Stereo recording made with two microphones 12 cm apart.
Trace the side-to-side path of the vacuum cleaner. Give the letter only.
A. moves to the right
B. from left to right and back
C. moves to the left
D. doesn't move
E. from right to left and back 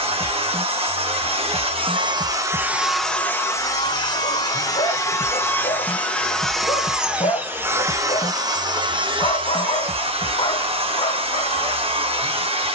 E.